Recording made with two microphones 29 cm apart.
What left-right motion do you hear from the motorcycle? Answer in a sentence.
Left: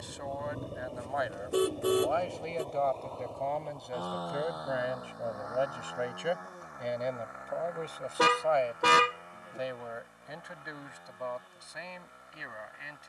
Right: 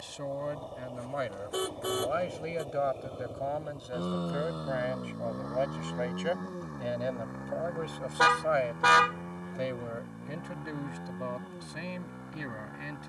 In this clip you hear the motorcycle move from left to right.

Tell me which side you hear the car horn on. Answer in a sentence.
You can hear the car horn on the left.